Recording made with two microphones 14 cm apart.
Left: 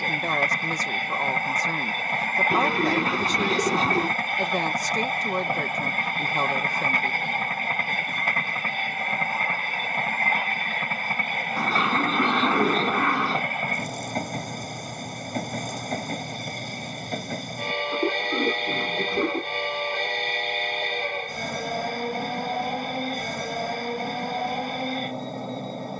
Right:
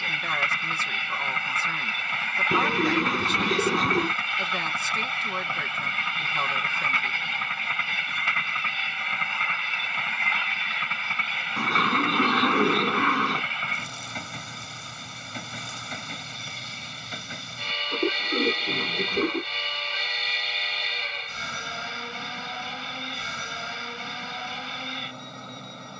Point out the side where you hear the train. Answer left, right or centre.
left.